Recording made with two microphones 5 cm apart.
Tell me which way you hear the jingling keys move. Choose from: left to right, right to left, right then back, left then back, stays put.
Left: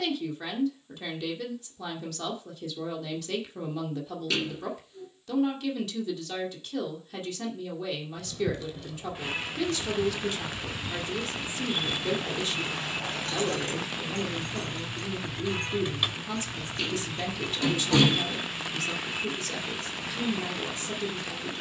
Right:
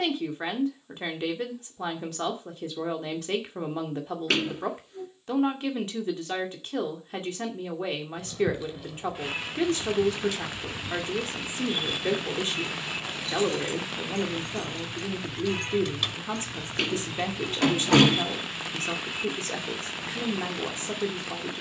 left then back.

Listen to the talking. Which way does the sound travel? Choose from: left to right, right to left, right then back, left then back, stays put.
stays put.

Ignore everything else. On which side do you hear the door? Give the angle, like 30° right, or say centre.
60° right.